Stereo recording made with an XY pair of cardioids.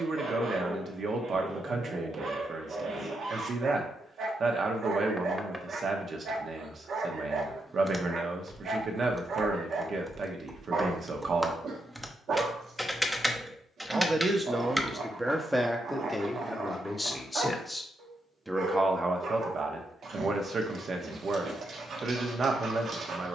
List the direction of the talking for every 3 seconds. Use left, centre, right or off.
right, right, right, right, right, centre, right, right.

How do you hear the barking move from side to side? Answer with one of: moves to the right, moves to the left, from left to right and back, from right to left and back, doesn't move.
doesn't move.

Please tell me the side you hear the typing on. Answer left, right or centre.
centre.